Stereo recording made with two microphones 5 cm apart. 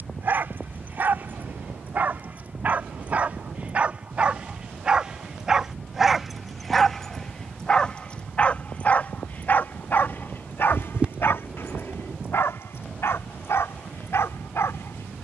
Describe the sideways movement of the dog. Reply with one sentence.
In this clip you hear the dog travel towards the left.